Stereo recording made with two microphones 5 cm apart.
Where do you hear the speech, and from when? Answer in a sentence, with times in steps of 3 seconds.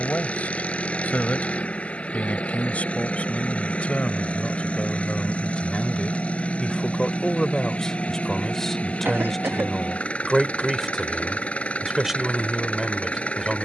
In this clip you hear the speech on the left from 0 s and in the centre from 6 s.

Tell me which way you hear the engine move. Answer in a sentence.
You can hear the engine stay put.